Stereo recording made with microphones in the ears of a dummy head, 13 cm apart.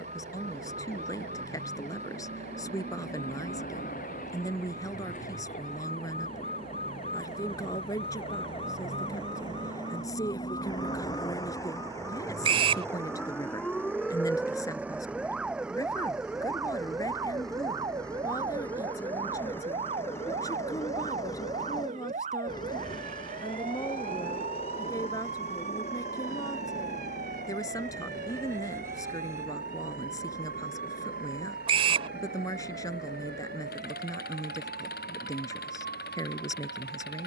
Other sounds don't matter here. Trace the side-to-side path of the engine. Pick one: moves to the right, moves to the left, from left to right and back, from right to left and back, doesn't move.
moves to the left.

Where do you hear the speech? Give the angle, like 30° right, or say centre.
30° left.